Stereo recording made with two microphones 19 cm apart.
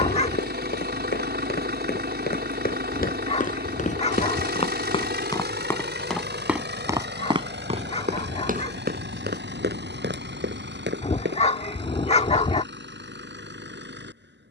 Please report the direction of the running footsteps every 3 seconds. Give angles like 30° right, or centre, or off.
60° left, 30° left, 30° right, 60° right, off.